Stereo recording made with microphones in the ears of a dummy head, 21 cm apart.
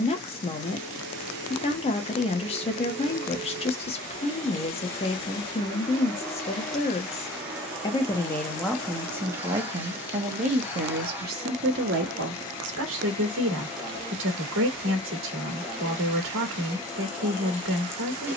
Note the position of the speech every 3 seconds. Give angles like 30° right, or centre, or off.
30° left, 30° left, 20° left, 30° right, 60° right, 60° right.